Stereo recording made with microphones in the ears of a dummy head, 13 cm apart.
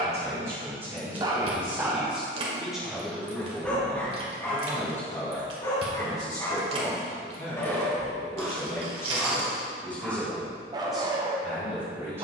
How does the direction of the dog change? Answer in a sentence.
You can hear the dog go left and come back.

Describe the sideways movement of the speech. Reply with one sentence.
You can hear the speech go left and come back.